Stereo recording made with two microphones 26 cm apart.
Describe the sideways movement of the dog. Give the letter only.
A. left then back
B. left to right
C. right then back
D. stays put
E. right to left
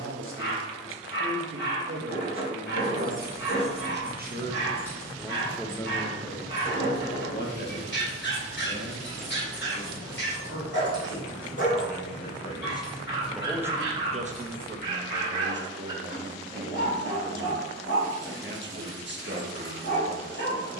D.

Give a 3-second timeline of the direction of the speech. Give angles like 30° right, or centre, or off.
50° right, 20° right, 40° left, 50° left, 10° right, 40° right, 40° right.